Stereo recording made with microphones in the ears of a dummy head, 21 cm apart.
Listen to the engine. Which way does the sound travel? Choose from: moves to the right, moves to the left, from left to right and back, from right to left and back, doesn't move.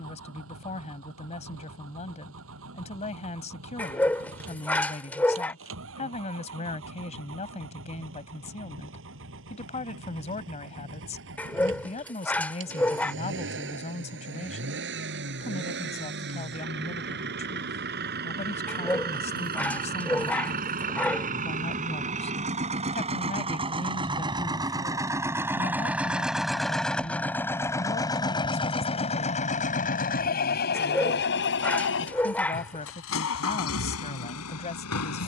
moves to the left.